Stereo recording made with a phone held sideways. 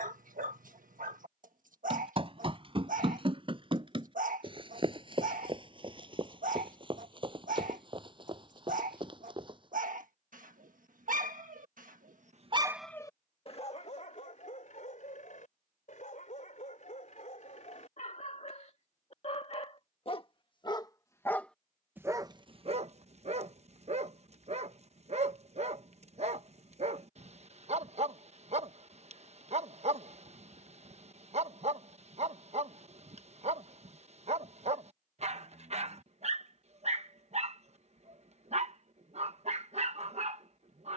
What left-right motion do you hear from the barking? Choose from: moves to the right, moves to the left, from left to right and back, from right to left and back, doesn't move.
from right to left and back.